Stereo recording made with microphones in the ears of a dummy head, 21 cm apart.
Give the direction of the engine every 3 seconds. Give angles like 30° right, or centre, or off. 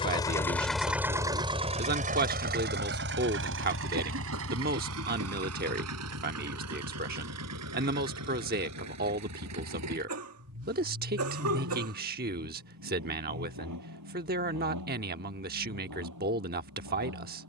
20° right, 60° right, 70° right, 80° right, 80° right, 80° right.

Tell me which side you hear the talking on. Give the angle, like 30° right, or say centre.
40° right.